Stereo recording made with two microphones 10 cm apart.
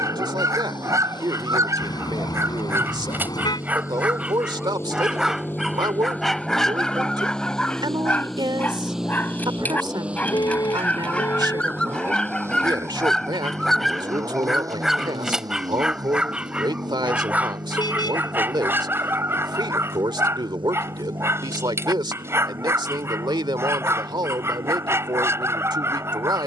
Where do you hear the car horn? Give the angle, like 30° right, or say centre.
40° left.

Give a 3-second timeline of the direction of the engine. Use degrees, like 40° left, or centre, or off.
40° left, 30° left, 10° left, 10° right, 30° right, 40° right, 50° right, 50° right, 60° right.